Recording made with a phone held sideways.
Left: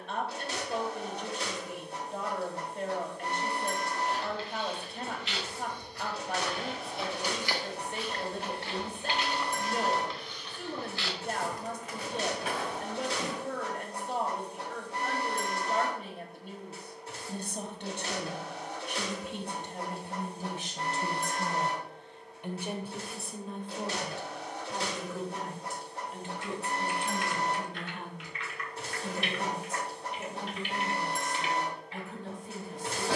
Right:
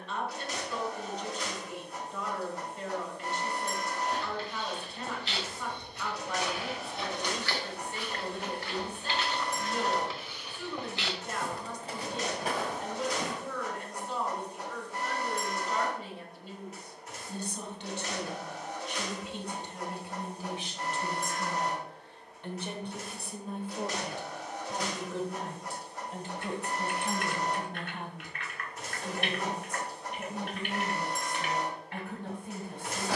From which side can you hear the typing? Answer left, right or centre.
right.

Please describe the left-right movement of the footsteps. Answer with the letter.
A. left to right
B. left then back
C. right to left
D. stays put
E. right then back
B.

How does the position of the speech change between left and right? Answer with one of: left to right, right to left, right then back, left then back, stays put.
left to right.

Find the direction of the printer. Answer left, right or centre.
left.